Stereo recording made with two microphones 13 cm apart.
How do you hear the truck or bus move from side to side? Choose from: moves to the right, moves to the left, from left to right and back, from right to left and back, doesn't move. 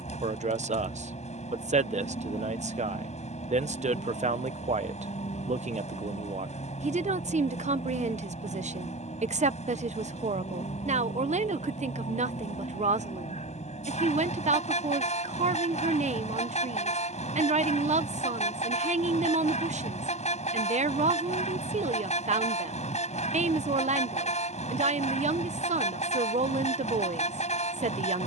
doesn't move.